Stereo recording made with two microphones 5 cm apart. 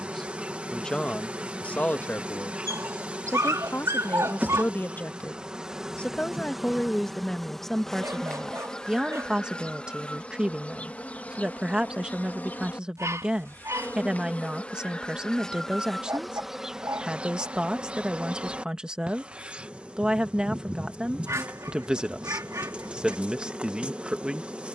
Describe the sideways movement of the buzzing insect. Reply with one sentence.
You can hear the buzzing insect move from right to left and back again.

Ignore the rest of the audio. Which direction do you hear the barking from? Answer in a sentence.
In this clip you hear the barking on the right.